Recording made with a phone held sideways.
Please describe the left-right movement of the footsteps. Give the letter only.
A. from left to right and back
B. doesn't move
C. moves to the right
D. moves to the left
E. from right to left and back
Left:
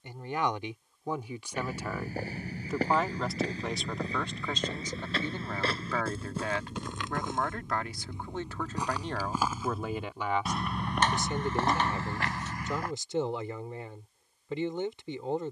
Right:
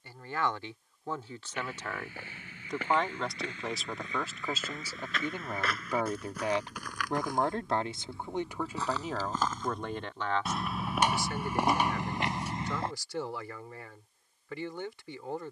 C.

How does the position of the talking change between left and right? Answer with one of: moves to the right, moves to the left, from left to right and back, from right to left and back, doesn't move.
from left to right and back.